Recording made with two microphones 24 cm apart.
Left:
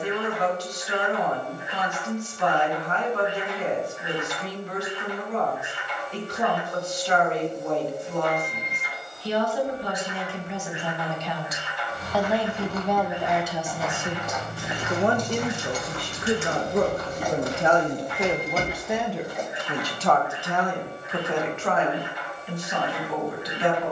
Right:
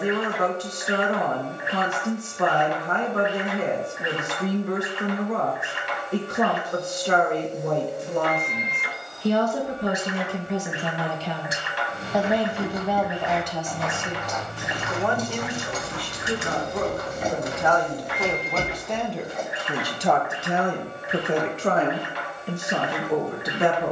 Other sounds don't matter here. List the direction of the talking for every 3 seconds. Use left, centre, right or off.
right, right, right, right, centre, left, centre, right.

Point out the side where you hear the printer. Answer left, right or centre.
right.